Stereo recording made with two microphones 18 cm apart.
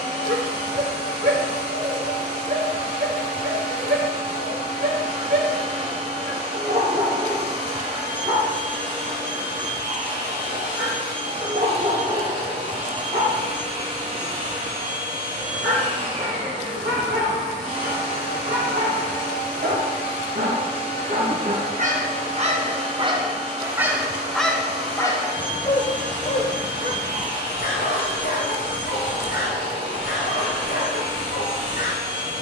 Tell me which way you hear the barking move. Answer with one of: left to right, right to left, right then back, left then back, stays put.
right to left.